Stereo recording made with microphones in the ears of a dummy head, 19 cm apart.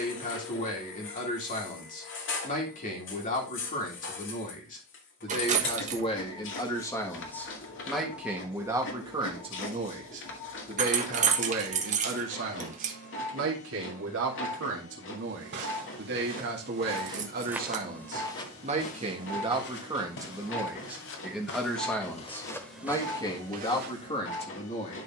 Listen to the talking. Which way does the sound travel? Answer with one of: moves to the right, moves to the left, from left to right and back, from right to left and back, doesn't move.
from left to right and back.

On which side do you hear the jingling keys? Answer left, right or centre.
right.